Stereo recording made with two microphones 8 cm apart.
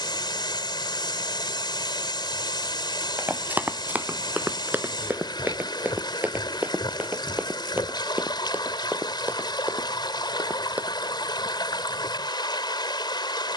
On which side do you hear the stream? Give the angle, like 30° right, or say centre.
80° left.